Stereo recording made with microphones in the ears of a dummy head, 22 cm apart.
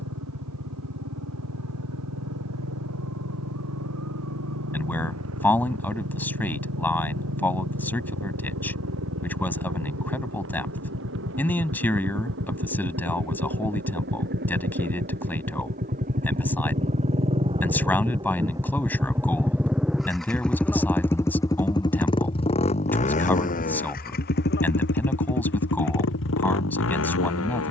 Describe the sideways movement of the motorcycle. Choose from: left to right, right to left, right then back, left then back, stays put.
right to left.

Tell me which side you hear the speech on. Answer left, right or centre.
centre.